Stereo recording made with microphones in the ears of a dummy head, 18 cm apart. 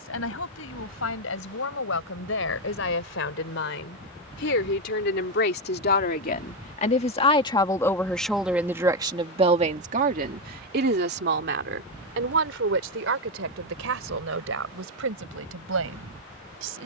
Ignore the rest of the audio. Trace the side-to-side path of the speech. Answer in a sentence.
You can hear the speech go from the left side to the right.